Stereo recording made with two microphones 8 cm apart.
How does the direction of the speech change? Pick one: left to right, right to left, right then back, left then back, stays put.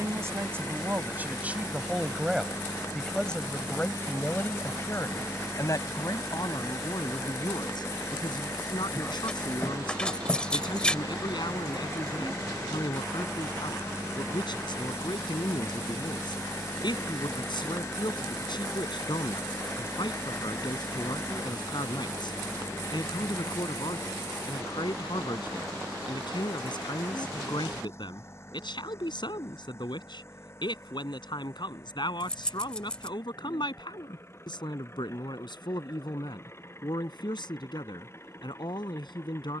right to left.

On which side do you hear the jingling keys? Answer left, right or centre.
centre.